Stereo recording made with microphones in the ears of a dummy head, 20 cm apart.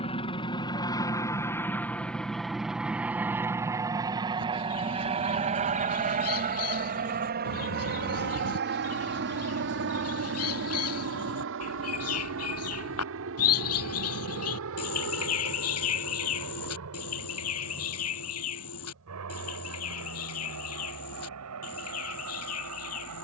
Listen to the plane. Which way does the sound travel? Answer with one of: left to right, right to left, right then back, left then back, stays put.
left to right.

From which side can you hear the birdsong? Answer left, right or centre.
left.